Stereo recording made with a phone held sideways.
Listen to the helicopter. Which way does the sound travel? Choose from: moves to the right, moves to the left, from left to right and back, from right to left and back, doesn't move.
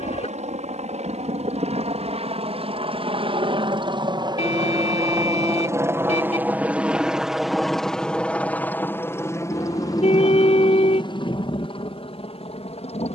moves to the left.